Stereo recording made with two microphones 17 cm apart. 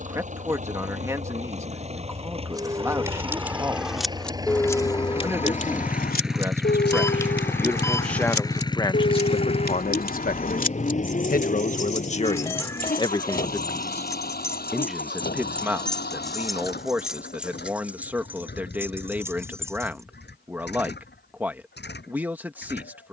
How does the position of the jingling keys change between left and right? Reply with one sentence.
You can hear the jingling keys move from right to left and back again.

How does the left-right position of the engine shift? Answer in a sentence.
You can hear the engine move from right to left.